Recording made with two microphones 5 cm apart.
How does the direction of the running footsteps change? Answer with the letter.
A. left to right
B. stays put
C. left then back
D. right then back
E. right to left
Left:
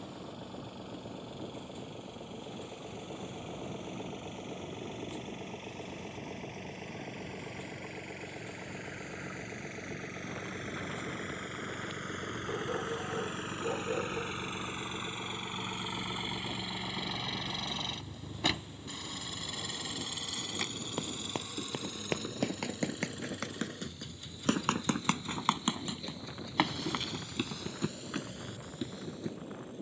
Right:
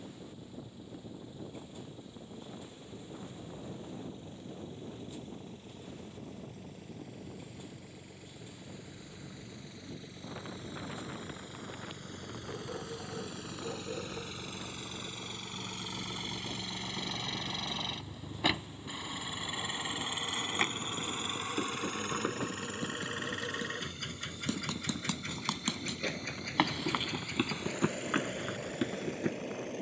A.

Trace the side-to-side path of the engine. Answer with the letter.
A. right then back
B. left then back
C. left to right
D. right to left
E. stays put
C.